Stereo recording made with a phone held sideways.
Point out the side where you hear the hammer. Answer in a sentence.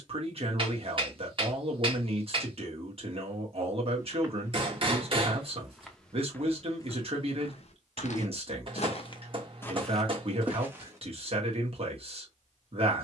You can hear the hammer on the right.